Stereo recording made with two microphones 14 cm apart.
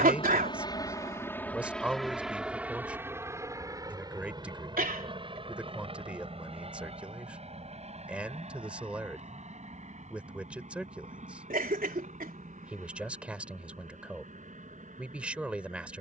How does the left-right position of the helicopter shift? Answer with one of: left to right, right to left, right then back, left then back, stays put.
left to right.